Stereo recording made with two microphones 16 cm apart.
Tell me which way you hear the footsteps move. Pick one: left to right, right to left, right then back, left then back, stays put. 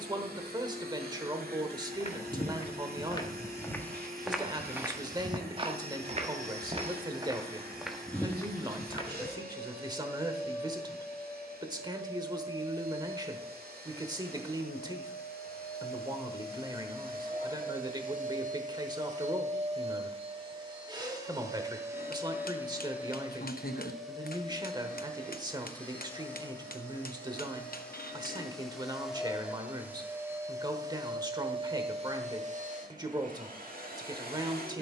right then back.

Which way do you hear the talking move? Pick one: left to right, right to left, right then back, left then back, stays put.
stays put.